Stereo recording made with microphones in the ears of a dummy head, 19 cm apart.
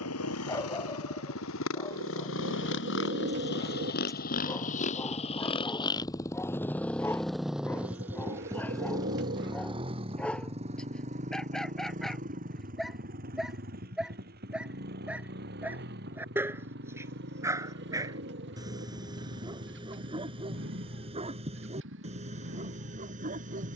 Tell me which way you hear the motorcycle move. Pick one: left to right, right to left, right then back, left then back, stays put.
left to right.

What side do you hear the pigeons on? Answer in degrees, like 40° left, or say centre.
50° right.